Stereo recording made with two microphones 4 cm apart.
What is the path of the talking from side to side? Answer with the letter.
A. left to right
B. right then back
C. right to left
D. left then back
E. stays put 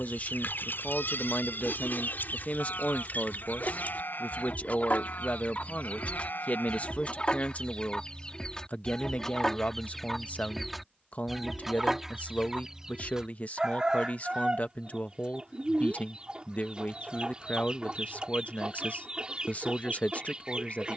E.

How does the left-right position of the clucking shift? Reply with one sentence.
You can hear the clucking move from left to right.